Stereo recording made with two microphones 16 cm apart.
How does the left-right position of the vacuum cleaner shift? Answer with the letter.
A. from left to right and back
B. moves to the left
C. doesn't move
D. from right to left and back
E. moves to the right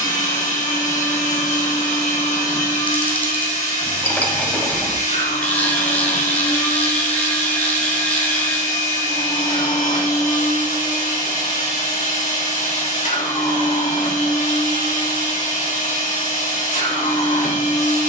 C.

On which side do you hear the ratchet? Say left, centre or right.
centre.